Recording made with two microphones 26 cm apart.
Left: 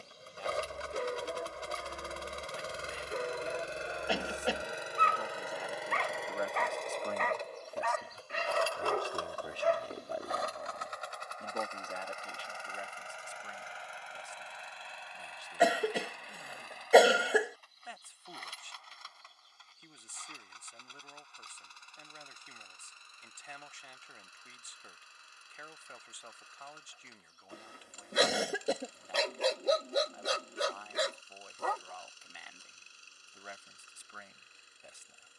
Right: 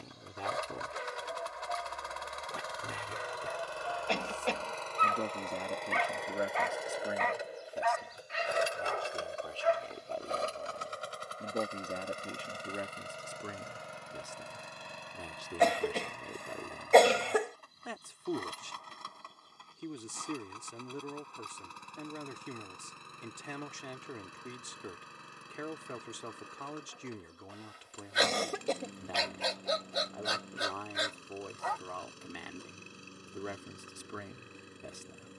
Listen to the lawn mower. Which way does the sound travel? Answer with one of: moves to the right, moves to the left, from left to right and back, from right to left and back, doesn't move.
moves to the right.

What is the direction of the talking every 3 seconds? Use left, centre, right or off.
right, right, centre, centre, right, right, right, right, right, right, right, right.